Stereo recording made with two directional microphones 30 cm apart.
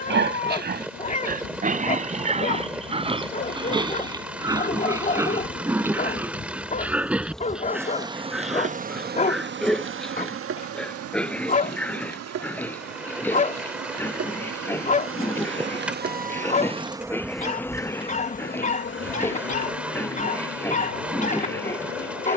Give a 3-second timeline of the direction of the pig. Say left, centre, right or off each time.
right, centre, centre, centre, centre, centre, centre, centre.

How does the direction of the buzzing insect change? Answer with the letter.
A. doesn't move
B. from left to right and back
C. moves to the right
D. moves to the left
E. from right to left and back
B.